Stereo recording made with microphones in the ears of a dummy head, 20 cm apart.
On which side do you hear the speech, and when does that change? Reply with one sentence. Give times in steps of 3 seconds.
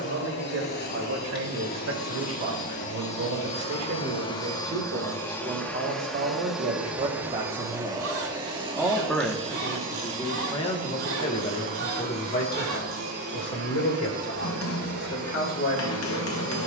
In this clip you hear the speech on the right from 0 s and on the left from 9 s.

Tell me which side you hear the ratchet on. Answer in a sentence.
In this clip you hear the ratchet on the right.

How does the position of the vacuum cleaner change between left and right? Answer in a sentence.
In this clip you hear the vacuum cleaner travel towards the right.